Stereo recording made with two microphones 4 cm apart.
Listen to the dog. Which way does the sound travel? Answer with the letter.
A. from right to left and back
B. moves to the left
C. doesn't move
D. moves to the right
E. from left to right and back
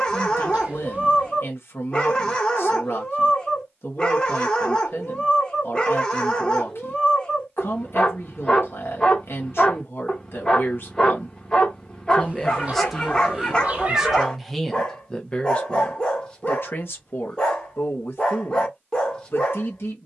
C.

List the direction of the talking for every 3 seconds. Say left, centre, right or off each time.
left, left, left, left, centre, left, left.